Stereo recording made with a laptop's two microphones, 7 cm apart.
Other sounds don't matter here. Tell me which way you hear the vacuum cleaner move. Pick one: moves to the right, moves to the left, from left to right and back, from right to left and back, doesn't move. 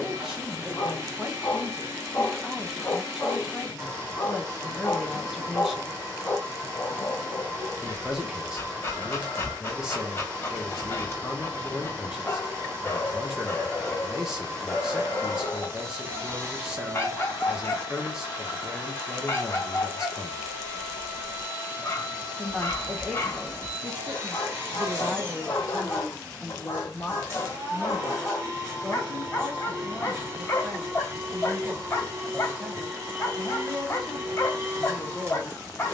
doesn't move.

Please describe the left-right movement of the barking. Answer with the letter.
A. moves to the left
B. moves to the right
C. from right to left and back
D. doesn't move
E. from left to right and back
D.